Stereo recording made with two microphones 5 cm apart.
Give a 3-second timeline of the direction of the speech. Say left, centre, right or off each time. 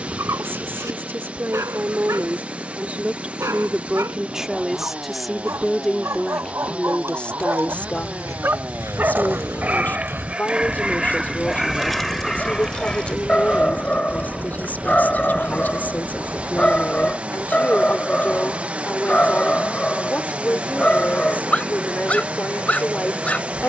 right, centre, left, left, left, left, left, left.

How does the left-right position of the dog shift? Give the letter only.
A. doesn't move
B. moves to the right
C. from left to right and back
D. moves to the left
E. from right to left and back
D.